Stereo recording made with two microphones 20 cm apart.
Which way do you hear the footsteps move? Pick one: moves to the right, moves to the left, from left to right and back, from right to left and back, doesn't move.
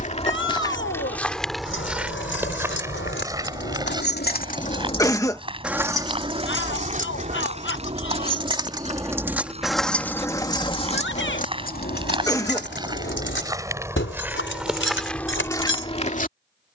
from left to right and back.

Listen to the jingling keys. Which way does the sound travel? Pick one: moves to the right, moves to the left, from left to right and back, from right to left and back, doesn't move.
from left to right and back.